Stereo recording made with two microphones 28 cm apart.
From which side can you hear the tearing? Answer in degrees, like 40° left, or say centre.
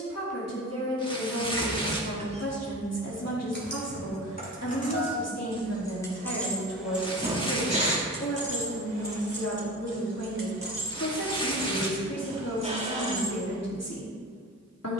20° left.